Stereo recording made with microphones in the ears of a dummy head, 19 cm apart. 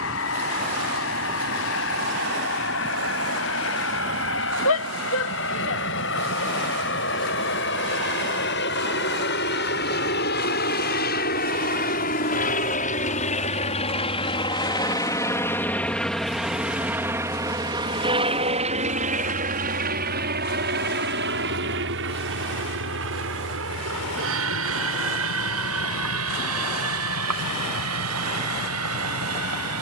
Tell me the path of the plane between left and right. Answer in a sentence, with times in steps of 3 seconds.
You can hear the plane on the left from 0 s, in the centre from 15 s and on the right from 18 s.